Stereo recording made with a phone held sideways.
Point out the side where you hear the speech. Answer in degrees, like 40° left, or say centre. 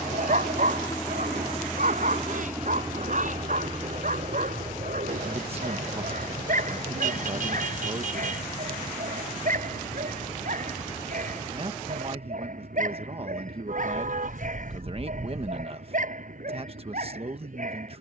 40° right.